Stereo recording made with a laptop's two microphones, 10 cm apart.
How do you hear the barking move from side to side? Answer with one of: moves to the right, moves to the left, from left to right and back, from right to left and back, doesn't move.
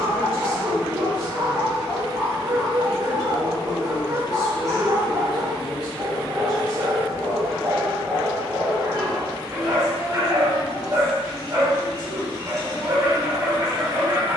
doesn't move.